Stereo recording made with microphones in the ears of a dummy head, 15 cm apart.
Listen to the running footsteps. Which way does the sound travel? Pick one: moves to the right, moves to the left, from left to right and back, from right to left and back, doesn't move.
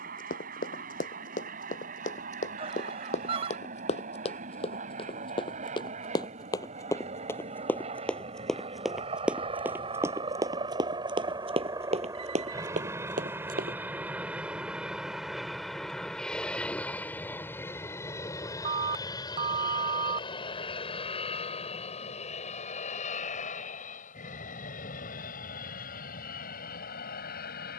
moves to the right.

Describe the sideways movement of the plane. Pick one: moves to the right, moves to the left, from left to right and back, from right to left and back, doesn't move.
moves to the left.